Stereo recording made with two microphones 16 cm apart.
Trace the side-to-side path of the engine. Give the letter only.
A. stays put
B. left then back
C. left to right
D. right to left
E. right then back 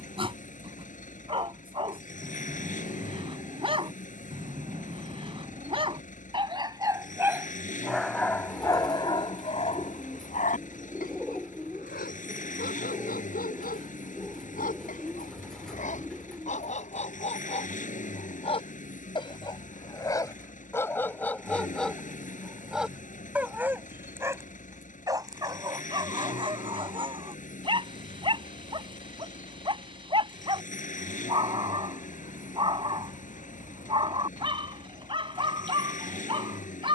A.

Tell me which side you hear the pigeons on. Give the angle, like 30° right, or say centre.
centre.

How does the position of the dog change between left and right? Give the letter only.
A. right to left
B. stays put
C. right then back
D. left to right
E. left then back
E.